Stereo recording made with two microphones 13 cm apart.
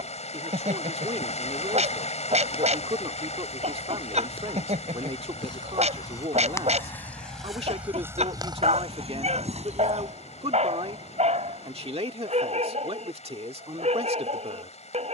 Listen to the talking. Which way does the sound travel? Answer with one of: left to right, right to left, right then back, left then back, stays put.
stays put.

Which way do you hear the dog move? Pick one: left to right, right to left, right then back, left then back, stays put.
stays put.